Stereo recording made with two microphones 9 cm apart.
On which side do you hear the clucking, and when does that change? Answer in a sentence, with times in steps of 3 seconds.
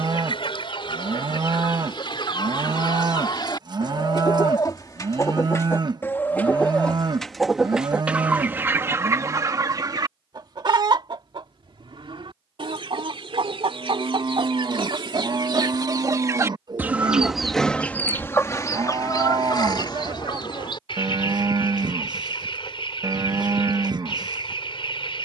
You can hear the clucking on the left from 0 s, in the centre from 6 s, on the right from 9 s and on the left from 18 s.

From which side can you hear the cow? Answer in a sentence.
In this clip you hear the cow on the right.